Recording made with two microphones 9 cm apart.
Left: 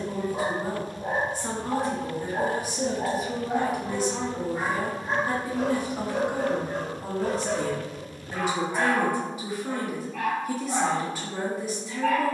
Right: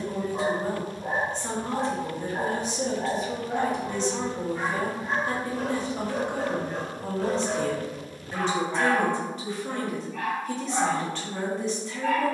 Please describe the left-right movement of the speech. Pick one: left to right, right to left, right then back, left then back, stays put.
stays put.